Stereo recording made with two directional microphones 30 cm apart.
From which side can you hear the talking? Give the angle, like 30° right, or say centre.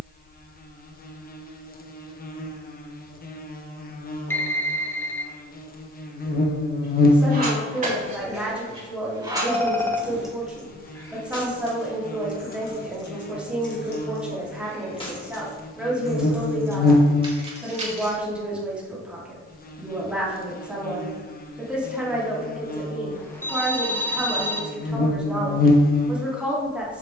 centre.